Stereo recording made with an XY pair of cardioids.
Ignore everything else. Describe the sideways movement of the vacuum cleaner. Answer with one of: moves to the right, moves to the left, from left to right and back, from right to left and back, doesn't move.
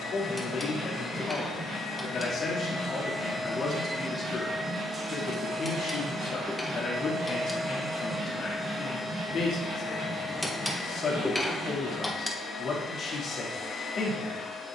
from left to right and back.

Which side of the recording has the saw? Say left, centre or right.
right.